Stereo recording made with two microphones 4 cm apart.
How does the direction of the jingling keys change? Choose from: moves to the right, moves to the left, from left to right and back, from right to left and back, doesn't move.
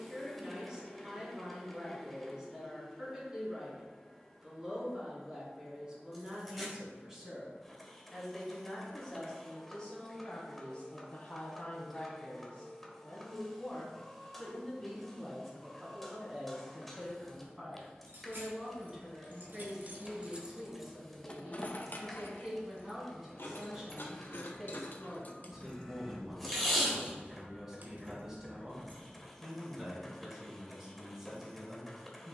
from right to left and back.